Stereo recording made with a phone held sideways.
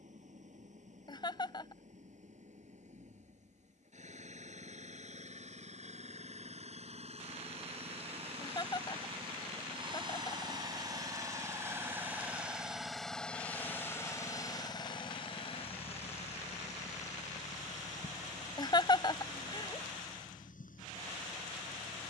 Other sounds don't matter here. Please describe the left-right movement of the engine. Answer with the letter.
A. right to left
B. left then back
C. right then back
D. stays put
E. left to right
A.